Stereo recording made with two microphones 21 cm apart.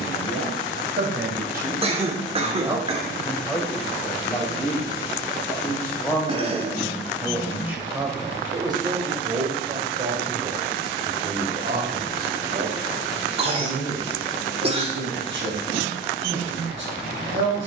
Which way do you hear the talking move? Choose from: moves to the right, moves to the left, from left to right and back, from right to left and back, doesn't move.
from right to left and back.